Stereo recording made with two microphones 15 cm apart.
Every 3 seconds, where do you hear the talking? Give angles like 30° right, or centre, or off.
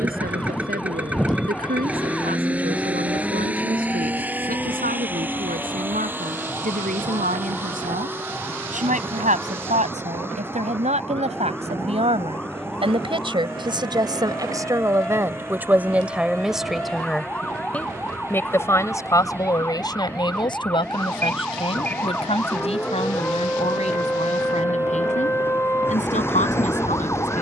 80° right, 70° right, 60° right, 50° right, 30° right, 10° right, 30° left, 40° left, 50° left.